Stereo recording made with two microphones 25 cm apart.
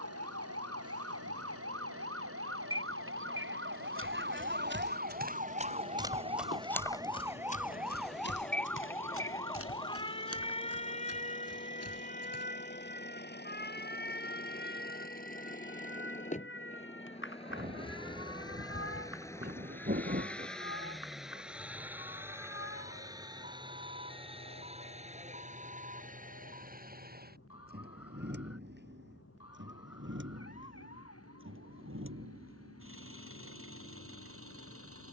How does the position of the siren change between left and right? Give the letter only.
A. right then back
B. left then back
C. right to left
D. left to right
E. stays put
C.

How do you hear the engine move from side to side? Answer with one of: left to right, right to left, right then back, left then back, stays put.
left to right.